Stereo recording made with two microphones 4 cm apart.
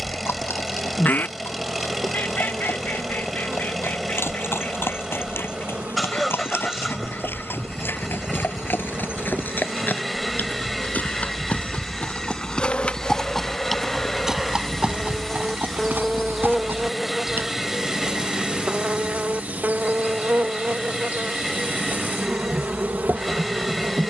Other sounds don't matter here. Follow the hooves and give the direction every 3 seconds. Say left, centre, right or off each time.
left, left, left, left, centre, right, off, off.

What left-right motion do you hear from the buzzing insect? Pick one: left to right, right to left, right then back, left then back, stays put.
left then back.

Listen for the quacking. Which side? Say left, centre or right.
left.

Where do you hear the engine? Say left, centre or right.
centre.